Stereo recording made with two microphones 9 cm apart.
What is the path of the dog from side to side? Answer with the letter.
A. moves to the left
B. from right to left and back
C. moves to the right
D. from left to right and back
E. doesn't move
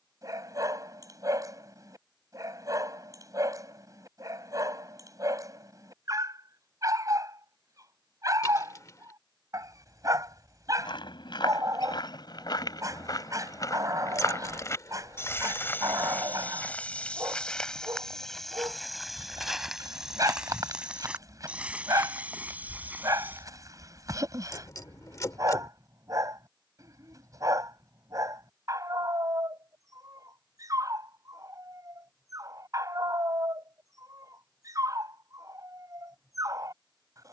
E.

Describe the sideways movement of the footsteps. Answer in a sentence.
In this clip you hear the footsteps move to the right.